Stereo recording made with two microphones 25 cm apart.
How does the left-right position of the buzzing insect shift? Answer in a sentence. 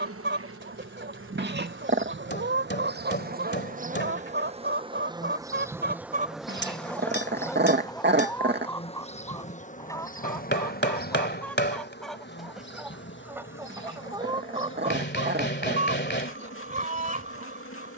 You can hear the buzzing insect travel towards the left.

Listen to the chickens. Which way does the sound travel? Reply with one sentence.
You can hear the chickens move from right to left and back again.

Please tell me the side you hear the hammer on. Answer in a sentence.
In this clip you hear the hammer on the left.